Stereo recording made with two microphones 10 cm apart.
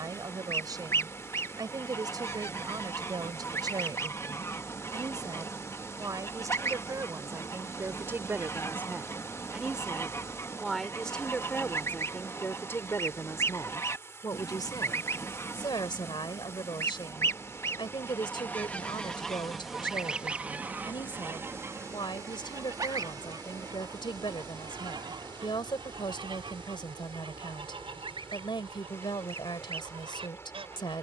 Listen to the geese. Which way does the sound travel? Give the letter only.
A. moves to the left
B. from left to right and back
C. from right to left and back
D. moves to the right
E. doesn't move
D.